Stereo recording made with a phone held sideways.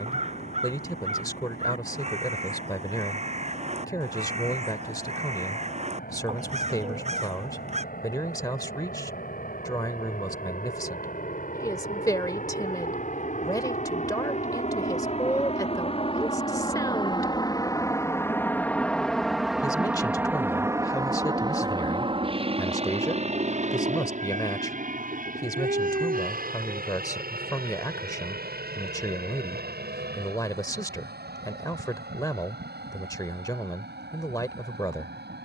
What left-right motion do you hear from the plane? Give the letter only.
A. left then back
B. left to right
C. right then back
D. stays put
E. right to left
B.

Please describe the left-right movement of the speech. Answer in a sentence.
You can hear the speech stay in one place.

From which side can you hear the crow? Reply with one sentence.
You can hear the crow on the right.